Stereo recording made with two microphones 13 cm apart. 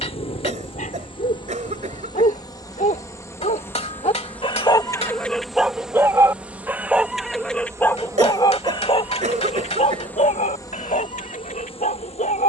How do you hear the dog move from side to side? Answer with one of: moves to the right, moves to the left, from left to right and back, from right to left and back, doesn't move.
from left to right and back.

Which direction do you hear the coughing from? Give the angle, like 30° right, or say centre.
60° right.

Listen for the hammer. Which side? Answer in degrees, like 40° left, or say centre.
50° left.